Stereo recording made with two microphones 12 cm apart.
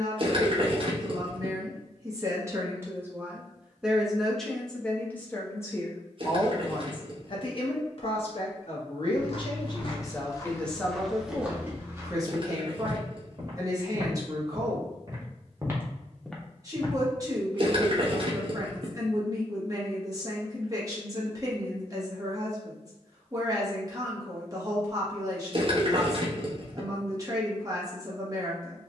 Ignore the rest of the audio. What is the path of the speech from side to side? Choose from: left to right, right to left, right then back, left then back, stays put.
left then back.